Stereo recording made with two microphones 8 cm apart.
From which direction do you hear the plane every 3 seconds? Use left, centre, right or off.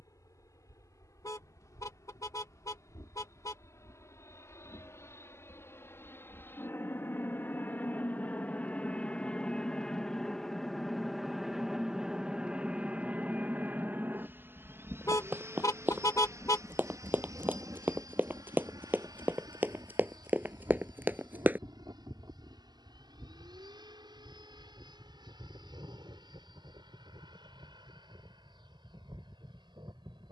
left, left, left, centre, right, right, right, right, right, right.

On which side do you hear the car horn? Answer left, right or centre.
left.